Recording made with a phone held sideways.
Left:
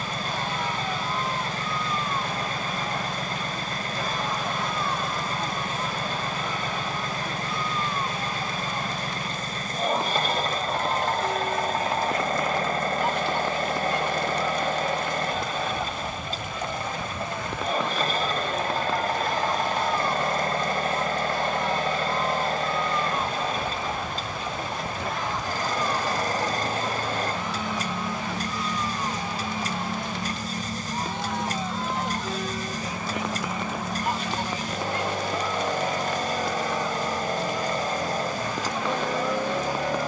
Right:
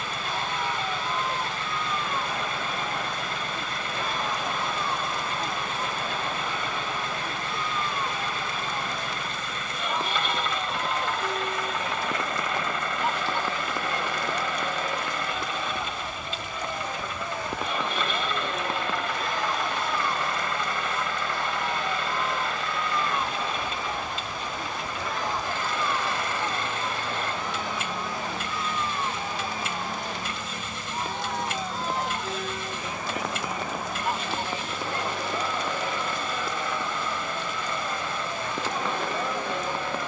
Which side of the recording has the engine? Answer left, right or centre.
left.